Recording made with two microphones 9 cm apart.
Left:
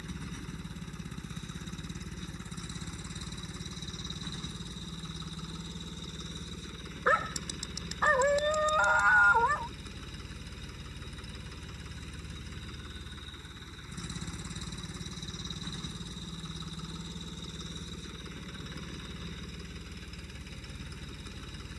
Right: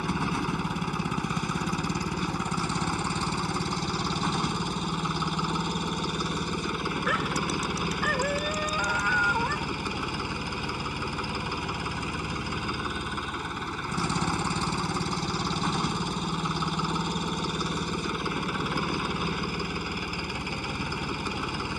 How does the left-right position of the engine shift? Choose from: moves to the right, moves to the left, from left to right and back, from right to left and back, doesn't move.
doesn't move.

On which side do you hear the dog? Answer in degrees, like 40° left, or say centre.
10° left.